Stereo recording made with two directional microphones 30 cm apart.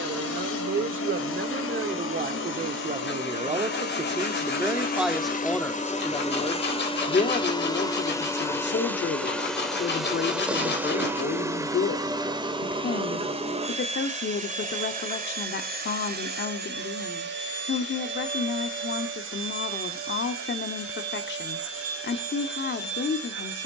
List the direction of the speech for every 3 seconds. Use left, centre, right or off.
right, centre, left, left, left, left, left, left.